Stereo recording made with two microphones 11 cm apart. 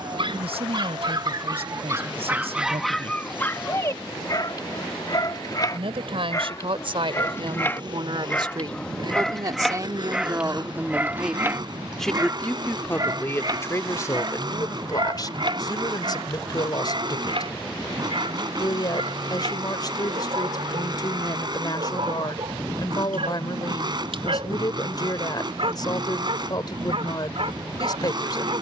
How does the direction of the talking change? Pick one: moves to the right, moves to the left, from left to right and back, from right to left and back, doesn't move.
moves to the left.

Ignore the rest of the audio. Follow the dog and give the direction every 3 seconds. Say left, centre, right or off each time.
right, left, left, centre, right, right, right, right, right, right.